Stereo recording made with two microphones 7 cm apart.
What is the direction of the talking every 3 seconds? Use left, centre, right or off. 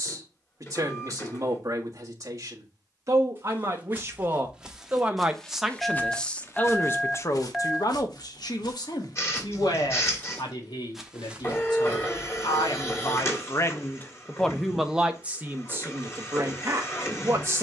right, right, left, left, left, right.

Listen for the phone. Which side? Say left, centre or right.
centre.